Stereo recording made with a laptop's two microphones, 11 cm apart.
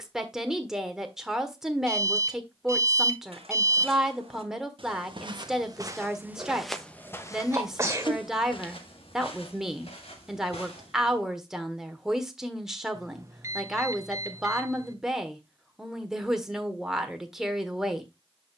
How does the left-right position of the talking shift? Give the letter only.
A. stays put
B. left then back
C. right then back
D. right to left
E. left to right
A.